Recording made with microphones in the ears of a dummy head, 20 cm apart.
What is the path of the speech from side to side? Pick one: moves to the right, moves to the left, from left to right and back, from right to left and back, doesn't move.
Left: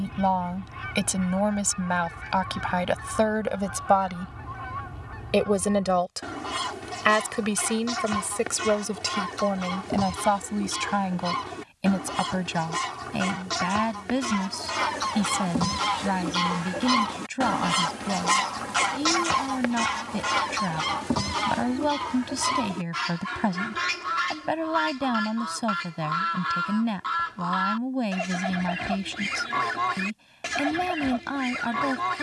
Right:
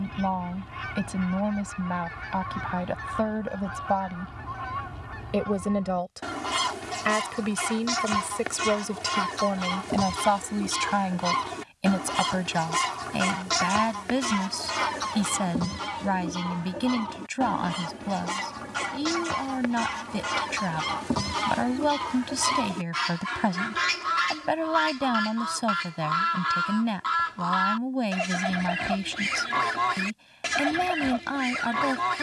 moves to the right.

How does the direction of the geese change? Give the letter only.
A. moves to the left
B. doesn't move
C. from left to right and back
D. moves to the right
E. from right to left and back
E.